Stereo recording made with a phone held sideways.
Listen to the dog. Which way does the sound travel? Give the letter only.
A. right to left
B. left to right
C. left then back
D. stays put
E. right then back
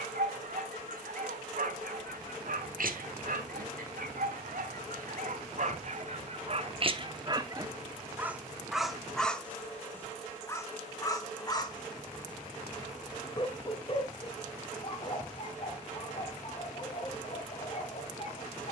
A.